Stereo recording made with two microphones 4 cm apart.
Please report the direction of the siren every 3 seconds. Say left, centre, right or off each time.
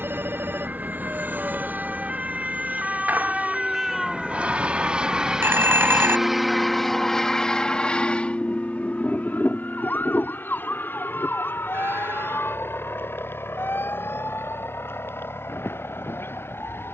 right, centre, left, left, left, left.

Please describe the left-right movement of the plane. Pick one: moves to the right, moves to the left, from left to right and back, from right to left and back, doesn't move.
moves to the left.